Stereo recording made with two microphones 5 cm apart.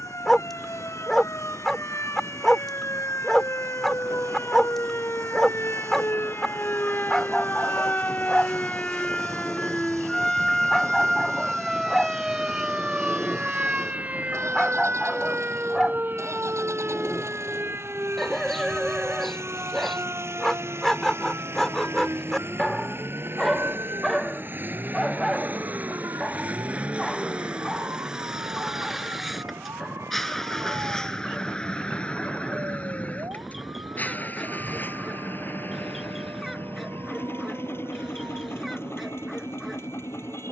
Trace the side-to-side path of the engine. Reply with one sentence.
In this clip you hear the engine move from right to left.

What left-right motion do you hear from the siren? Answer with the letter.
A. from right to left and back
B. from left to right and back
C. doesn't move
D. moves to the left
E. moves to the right
E.